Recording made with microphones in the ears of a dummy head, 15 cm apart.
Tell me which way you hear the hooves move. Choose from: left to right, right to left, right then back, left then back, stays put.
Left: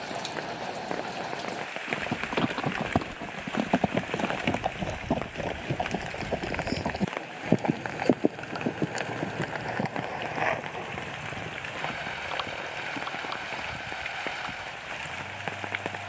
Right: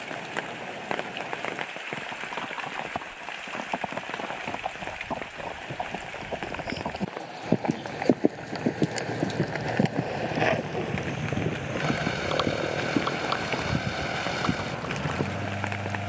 left to right.